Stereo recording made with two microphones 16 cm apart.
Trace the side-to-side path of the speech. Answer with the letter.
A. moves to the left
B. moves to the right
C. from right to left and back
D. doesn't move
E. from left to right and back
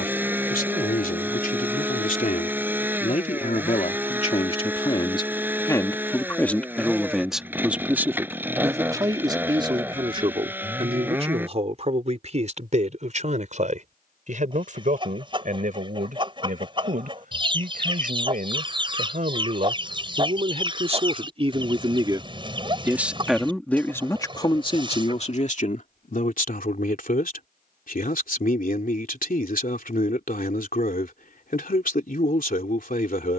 E.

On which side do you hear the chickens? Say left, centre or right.
right.